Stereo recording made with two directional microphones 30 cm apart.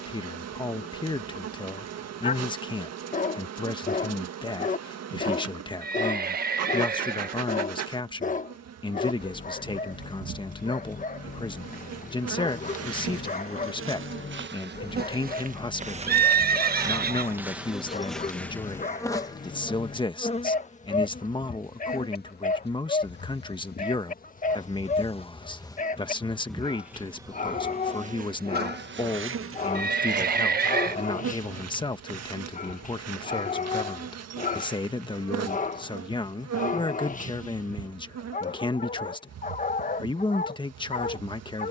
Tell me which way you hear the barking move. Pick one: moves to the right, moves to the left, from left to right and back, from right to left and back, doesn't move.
doesn't move.